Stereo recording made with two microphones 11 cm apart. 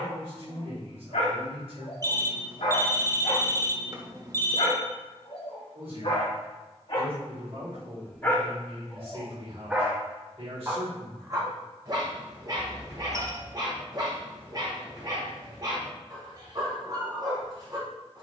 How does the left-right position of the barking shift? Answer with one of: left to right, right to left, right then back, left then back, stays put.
left to right.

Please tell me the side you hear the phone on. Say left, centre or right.
right.